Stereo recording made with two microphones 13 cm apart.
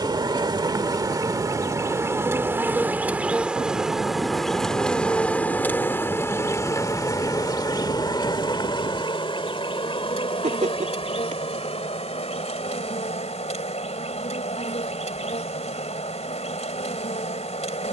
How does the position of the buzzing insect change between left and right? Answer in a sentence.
You can hear the buzzing insect travel towards the left.